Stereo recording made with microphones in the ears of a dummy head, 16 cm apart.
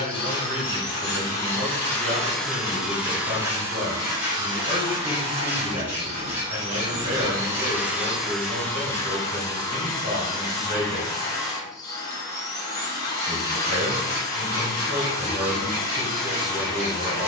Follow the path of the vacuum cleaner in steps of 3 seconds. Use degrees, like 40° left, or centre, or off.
10° left, 20° right, 10° right, 20° left, 20° left, 20° left.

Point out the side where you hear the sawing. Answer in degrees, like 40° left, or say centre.
10° right.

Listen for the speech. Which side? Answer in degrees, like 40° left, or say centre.
30° right.